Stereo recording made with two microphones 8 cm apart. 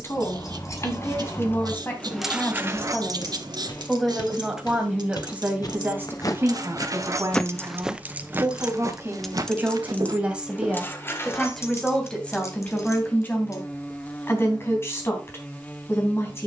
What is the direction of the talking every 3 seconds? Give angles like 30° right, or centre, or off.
30° left, 10° right, 40° right, 10° right, 30° left, 30° left.